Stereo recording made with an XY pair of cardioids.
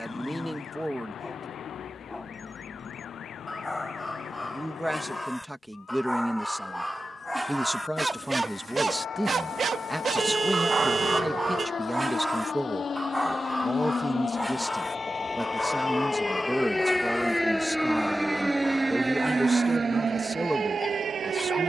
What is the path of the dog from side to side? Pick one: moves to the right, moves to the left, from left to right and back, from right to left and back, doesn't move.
from left to right and back.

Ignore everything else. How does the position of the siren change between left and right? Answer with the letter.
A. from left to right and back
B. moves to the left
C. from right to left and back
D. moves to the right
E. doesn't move
D.